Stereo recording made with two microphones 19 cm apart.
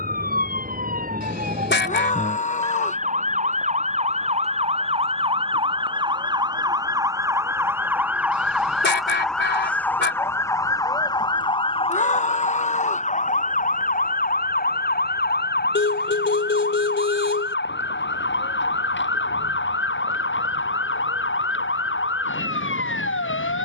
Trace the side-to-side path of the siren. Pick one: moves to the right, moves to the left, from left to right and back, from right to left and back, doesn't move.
moves to the left.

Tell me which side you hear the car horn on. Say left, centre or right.
left.